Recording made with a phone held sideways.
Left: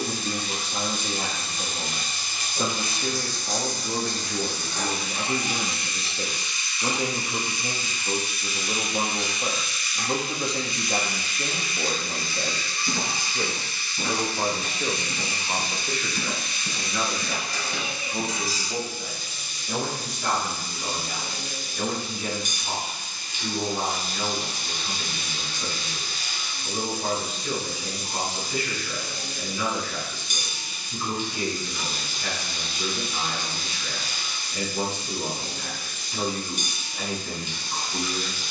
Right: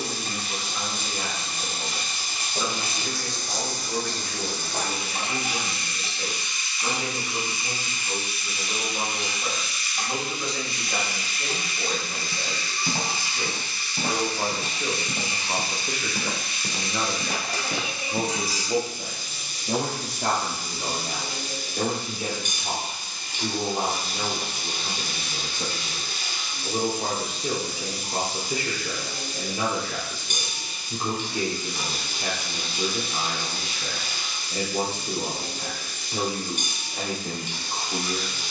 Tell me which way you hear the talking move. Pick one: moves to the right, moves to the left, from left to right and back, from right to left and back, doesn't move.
moves to the right.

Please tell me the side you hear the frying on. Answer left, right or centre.
right.